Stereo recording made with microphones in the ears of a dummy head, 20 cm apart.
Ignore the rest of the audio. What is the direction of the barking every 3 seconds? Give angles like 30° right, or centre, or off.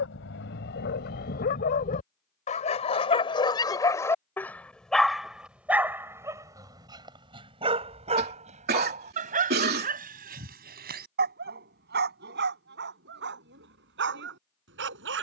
40° left, 10° left, 20° right, 40° right, 50° right.